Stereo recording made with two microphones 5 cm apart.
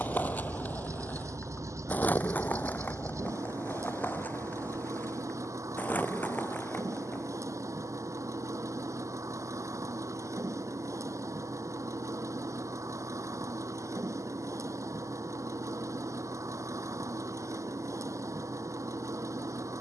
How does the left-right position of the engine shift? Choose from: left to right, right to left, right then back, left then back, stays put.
stays put.